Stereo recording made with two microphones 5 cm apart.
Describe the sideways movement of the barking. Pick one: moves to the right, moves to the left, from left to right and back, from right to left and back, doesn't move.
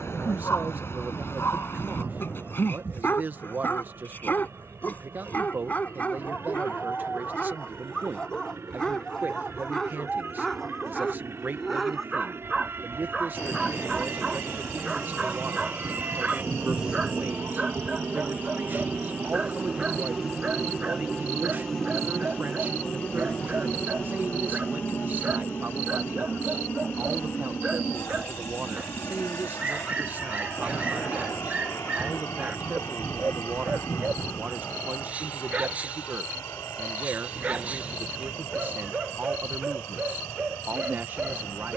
moves to the right.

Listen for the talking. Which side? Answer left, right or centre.
right.